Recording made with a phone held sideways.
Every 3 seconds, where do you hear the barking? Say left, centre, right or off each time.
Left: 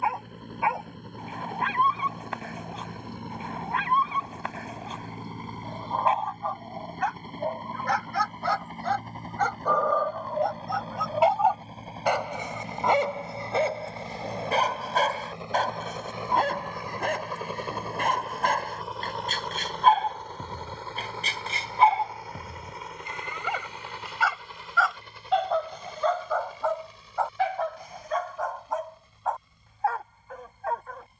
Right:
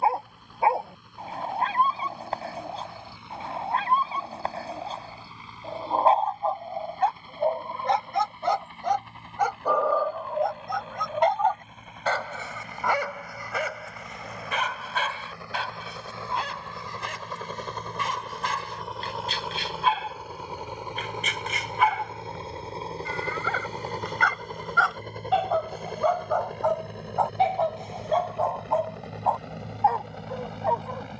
right, right, right, centre, left, left, left, left, centre, right, right.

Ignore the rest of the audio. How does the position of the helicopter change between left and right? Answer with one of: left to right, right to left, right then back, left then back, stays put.
left to right.